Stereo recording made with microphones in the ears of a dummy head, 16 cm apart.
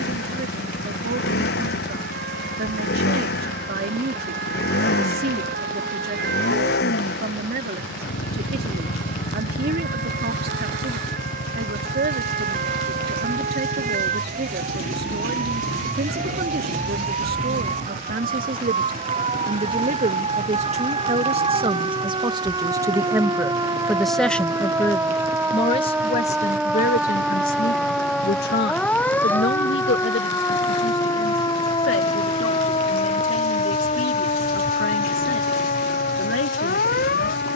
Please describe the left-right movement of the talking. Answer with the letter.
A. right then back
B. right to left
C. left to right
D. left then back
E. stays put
B.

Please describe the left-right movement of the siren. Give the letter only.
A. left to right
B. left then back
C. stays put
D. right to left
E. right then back
D.